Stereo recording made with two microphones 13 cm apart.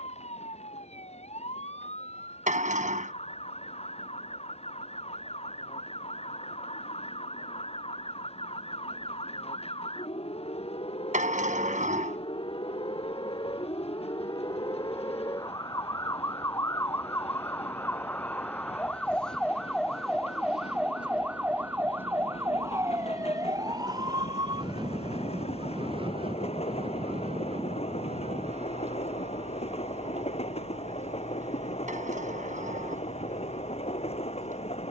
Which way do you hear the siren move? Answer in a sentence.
In this clip you hear the siren move from left to right.